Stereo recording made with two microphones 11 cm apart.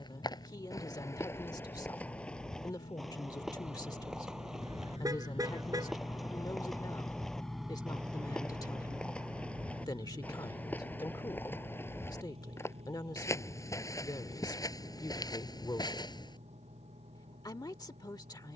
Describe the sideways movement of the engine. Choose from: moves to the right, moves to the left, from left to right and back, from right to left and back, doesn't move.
moves to the right.